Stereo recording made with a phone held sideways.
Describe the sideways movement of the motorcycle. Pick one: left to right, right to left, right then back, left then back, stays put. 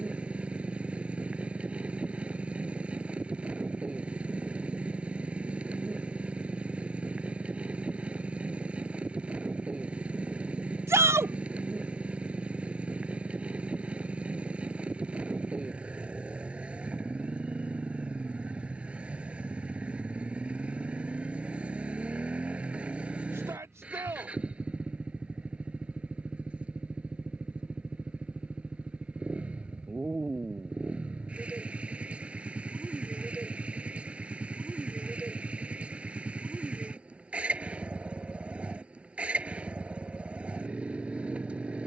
stays put.